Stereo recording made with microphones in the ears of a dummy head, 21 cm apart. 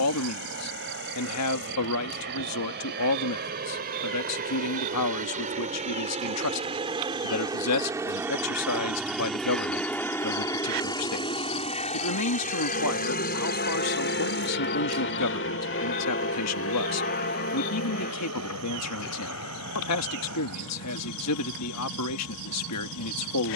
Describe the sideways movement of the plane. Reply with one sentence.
You can hear the plane go from the right side to the left.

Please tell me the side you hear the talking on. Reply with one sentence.
In this clip you hear the talking on the left.